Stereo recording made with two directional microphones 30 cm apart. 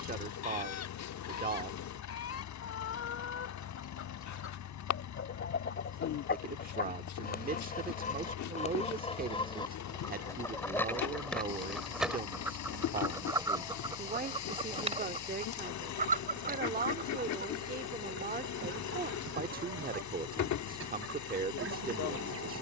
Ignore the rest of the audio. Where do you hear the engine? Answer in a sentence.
You can hear the engine on the left.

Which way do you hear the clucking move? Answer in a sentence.
In this clip you hear the clucking go from the left side to the right.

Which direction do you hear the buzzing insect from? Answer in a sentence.
You can hear the buzzing insect on the left.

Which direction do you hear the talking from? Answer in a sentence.
In this clip you hear the talking on the right.